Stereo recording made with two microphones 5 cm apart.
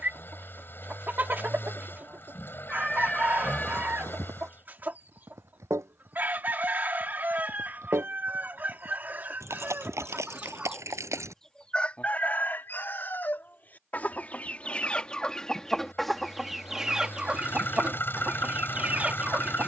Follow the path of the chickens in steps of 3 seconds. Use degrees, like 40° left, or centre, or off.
40° right, 40° right, 40° right, 30° right, 40° left, centre, 30° right.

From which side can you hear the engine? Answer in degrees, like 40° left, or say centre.
50° left.